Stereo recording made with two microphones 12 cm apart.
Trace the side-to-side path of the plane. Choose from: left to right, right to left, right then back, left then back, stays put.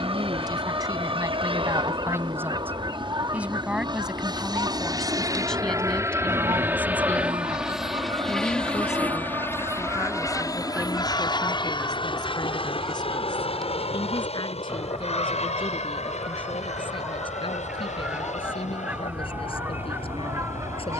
right to left.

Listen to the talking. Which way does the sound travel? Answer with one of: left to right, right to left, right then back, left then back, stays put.
right to left.